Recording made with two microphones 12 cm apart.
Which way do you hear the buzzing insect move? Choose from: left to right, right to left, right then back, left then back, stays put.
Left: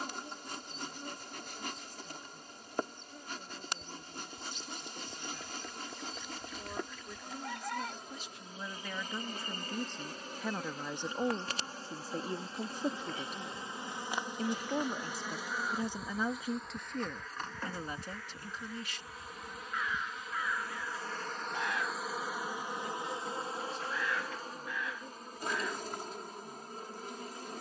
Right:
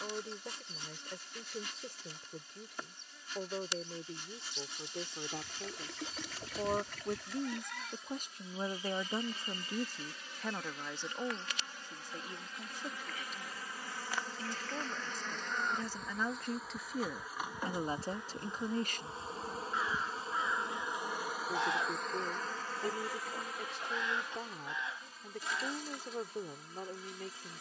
right then back.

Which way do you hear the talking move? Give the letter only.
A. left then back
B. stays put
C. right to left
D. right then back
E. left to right
A.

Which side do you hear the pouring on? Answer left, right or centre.
right.